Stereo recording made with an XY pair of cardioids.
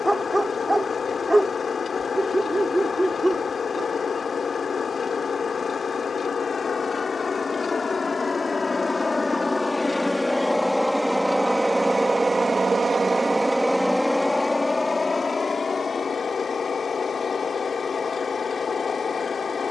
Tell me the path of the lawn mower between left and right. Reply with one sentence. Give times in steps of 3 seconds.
In this clip you hear the lawn mower on the left from 0 s, in the centre from 9 s and on the left from 15 s.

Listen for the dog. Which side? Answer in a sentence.
You can hear the dog in the centre.